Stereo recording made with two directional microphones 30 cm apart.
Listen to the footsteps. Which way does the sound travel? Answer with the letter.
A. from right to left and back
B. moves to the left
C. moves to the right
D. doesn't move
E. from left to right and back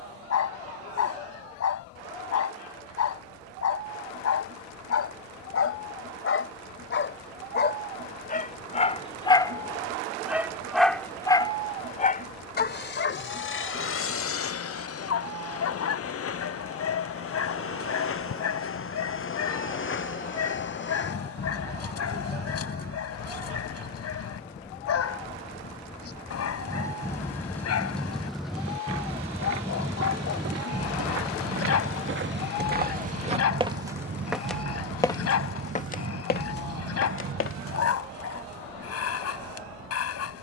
B.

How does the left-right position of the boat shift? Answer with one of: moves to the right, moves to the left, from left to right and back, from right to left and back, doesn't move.
moves to the right.